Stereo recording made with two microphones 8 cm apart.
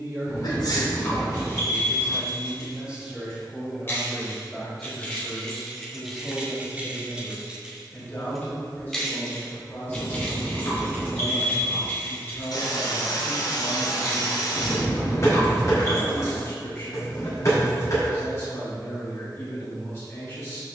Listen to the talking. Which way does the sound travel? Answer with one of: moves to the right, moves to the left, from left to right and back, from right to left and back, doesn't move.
moves to the left.